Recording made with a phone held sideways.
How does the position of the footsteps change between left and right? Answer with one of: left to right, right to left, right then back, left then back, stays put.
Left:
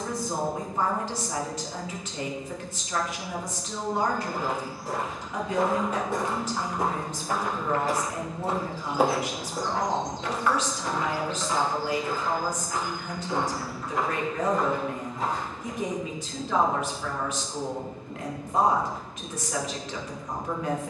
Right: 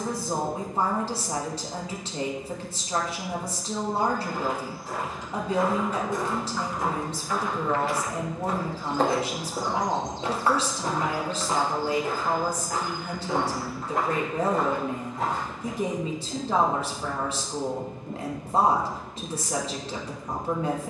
left to right.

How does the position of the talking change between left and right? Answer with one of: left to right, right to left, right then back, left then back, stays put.
stays put.